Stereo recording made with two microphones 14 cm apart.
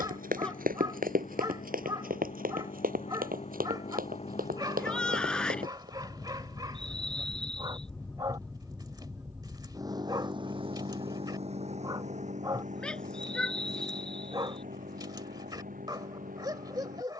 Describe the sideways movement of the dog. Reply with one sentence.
In this clip you hear the dog stay put.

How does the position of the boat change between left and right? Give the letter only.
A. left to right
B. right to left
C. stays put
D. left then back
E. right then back
A.